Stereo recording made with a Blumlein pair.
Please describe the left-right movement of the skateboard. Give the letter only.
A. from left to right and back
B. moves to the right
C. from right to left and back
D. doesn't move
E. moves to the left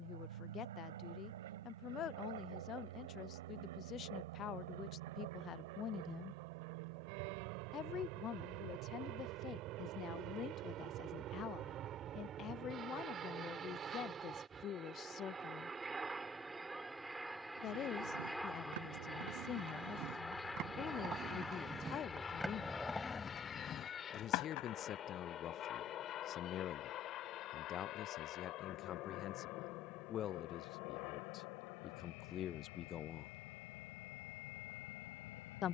E.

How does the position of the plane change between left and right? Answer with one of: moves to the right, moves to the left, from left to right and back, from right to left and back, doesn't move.
moves to the left.